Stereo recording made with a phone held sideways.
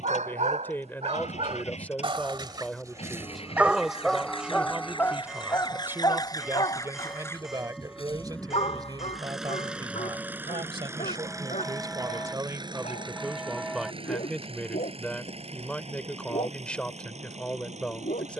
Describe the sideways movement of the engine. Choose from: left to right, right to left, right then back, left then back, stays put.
left to right.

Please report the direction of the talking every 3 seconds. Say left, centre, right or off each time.
centre, centre, right, right, centre, centre.